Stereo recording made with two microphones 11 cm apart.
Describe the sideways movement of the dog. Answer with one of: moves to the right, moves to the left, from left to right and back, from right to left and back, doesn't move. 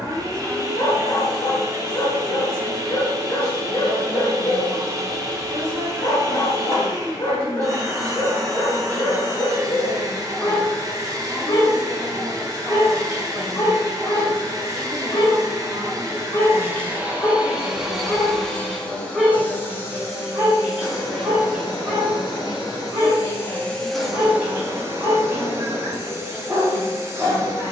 moves to the right.